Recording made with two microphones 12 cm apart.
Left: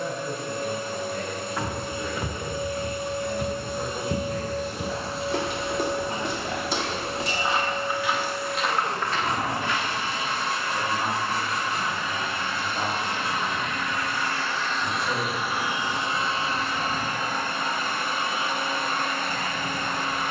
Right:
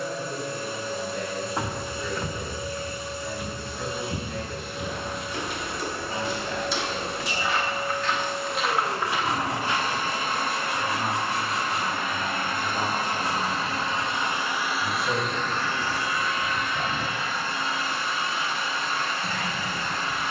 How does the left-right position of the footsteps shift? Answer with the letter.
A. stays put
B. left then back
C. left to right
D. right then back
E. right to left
B.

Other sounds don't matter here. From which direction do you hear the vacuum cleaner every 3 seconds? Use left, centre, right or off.
left, left, centre, right, right, left, left.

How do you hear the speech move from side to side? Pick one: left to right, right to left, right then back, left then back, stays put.
left to right.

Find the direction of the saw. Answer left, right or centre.
centre.